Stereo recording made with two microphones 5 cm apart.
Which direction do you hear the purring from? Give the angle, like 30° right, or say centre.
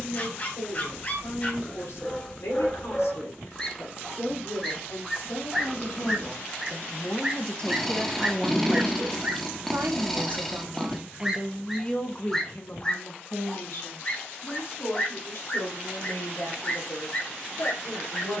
10° left.